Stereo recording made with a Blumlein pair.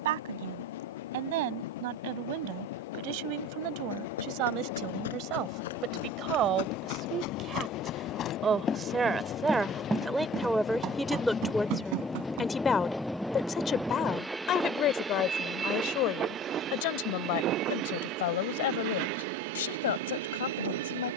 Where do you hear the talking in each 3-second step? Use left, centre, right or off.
right, right, right, centre, left, left, left.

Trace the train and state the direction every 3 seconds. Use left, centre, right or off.
left, left, left, left, centre, right, right.